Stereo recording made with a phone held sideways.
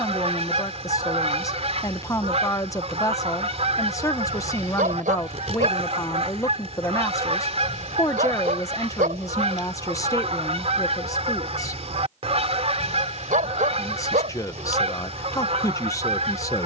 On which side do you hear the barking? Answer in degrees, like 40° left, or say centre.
70° right.